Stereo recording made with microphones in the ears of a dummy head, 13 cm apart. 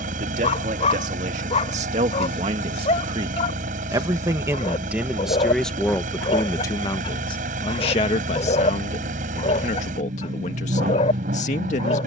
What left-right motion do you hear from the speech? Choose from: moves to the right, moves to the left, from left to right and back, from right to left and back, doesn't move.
moves to the left.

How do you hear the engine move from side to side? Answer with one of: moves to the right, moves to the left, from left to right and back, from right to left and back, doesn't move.
doesn't move.